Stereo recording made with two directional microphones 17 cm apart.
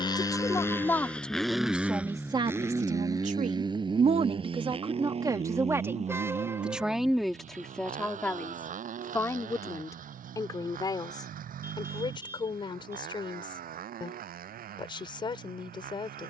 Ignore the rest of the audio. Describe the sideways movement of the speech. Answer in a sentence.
In this clip you hear the speech move from left to right and back again.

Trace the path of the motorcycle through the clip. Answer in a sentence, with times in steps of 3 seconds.
You can hear the motorcycle in the centre from 0 s and on the right from 3 s.